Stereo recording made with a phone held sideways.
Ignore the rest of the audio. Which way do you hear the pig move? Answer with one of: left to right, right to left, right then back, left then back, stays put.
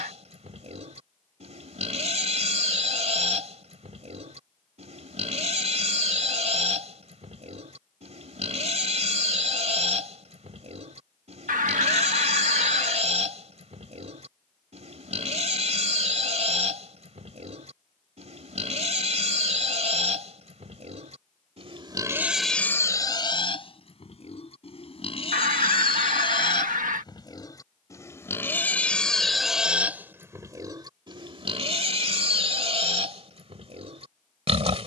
left then back.